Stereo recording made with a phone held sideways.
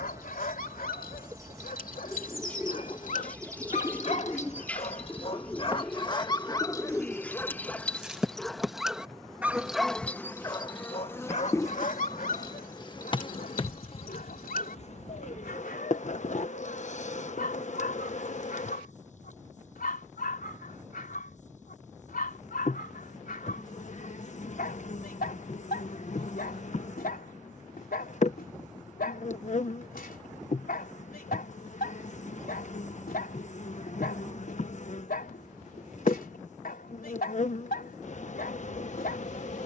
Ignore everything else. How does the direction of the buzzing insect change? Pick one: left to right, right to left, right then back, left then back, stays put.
right to left.